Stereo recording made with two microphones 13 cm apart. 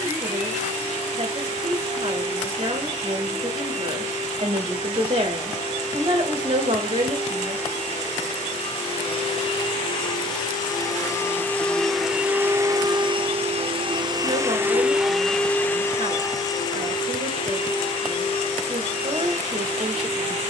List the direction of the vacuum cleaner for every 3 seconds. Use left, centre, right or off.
left, left, left, left, right, left, left.